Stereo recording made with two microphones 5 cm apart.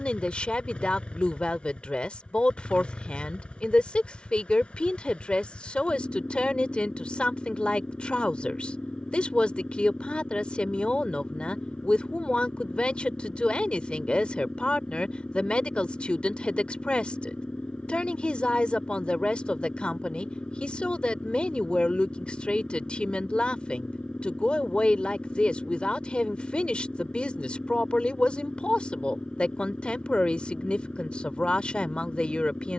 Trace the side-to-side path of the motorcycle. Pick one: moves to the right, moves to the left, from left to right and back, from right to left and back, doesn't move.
doesn't move.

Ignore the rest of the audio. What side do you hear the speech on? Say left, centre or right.
left.